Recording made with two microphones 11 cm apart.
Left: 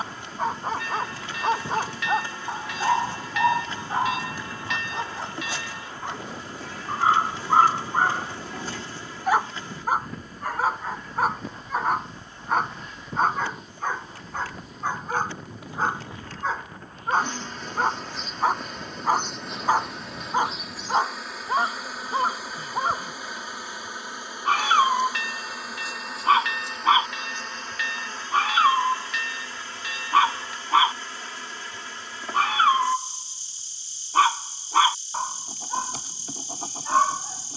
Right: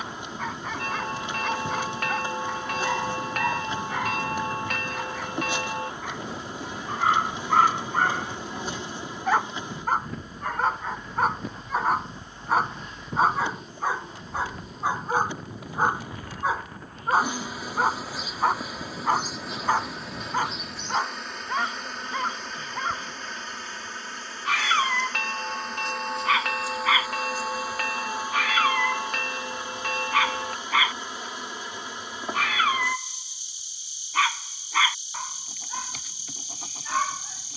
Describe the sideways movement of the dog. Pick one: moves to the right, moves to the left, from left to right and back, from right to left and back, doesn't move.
from left to right and back.